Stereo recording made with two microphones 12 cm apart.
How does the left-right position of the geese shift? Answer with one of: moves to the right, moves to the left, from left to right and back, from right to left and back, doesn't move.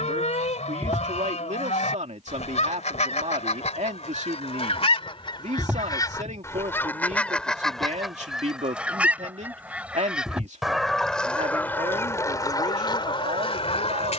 from left to right and back.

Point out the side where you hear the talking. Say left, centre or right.
right.